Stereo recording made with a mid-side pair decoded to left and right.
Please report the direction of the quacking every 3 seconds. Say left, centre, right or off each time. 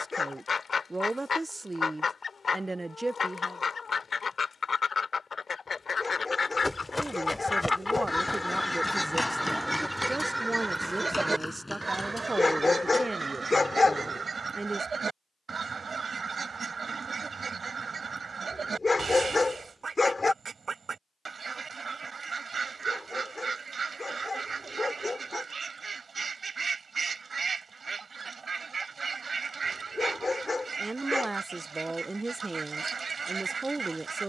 left, left, left, centre, right, right, right, right, right, right, right, right.